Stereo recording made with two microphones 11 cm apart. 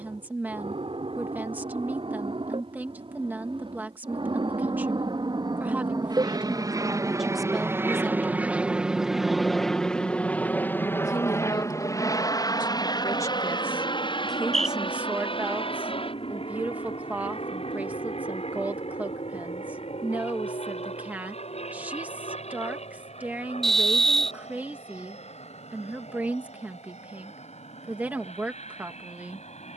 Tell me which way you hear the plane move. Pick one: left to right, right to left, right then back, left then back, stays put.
right to left.